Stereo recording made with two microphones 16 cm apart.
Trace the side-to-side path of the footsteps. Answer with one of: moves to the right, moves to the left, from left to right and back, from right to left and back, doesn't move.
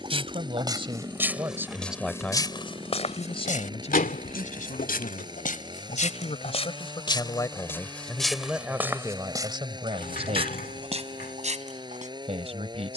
from right to left and back.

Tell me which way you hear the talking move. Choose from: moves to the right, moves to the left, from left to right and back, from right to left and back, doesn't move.
from right to left and back.